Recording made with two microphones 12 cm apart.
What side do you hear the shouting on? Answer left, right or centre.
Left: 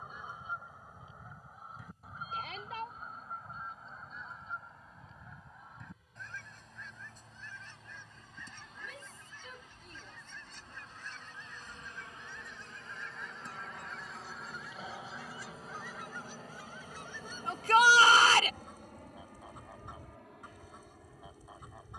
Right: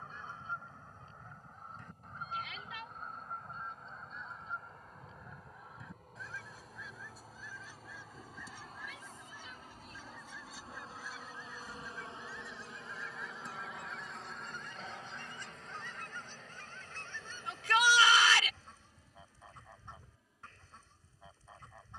left.